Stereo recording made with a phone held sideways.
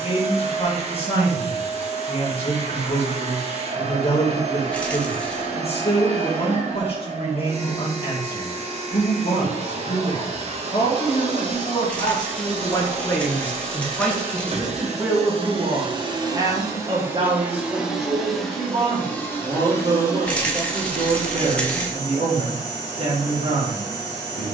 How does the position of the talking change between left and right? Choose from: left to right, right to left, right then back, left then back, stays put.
left to right.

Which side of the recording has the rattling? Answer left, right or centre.
centre.